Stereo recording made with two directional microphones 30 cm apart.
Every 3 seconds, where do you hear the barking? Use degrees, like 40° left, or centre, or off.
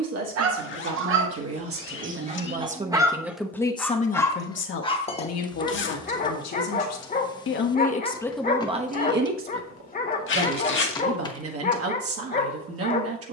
30° right, 10° left, 30° left, 30° left, 30° left.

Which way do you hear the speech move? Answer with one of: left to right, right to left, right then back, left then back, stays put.
left then back.